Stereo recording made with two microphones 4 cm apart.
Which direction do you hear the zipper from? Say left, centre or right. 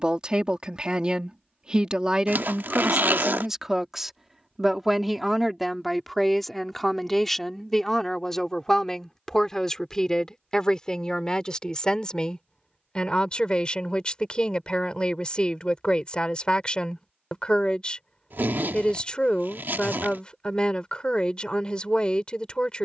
right.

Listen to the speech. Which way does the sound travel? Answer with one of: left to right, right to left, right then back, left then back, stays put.
right to left.